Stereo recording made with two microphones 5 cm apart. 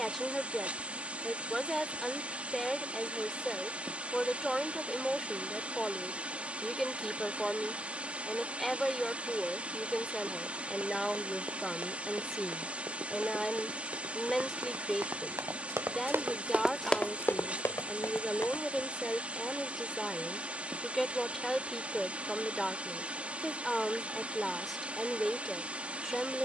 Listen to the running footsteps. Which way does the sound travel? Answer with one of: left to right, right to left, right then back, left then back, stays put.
right to left.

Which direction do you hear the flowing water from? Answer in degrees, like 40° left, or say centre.
30° right.